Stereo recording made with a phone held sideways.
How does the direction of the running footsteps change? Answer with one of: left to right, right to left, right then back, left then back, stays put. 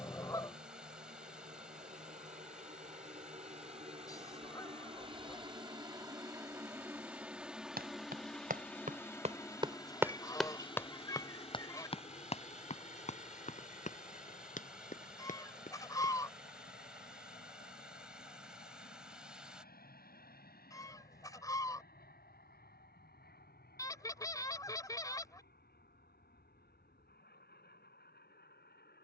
right to left.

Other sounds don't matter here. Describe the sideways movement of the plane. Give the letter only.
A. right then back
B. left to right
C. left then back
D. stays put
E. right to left
E.